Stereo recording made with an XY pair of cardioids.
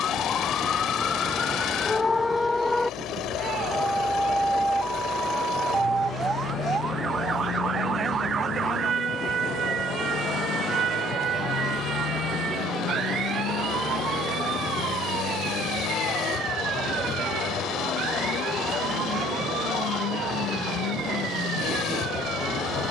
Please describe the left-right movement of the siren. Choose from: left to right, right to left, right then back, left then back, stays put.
left to right.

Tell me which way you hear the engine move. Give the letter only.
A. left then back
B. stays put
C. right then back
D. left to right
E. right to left
B.